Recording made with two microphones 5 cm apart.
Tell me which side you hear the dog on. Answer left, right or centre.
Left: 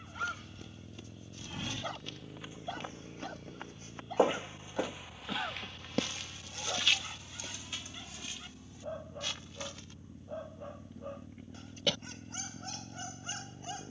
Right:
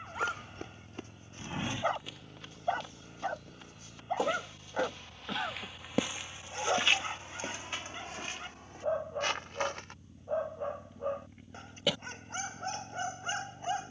right.